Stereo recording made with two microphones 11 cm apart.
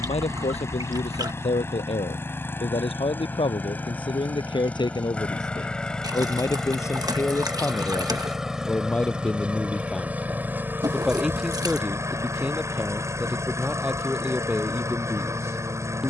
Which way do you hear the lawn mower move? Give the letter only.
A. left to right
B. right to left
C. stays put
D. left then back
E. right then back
A.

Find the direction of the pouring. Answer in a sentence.
You can hear the pouring on the right.